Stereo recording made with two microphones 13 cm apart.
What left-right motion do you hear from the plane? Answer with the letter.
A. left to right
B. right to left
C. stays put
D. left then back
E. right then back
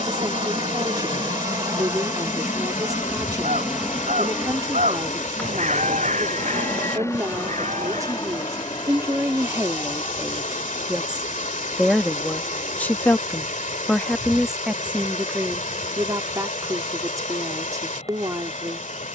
B.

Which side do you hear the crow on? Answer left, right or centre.
right.